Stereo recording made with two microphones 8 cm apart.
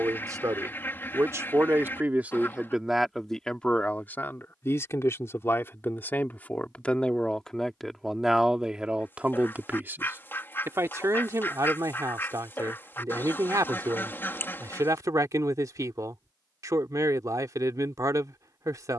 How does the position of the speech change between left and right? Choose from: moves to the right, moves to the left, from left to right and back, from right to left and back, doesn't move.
from right to left and back.